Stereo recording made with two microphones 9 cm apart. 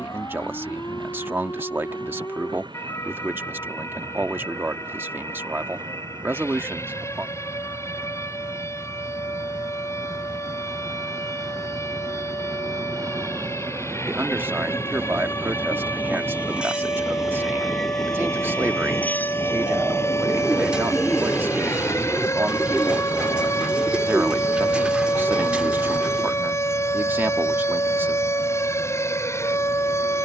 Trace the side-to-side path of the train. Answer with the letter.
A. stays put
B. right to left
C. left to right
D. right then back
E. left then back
B.